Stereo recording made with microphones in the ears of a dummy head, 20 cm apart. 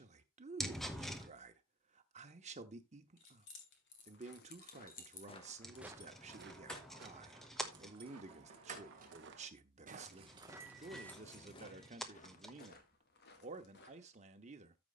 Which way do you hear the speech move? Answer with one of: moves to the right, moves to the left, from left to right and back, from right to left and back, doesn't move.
doesn't move.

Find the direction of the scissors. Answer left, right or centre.
centre.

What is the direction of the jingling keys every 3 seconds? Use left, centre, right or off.
off, left, centre, centre, off.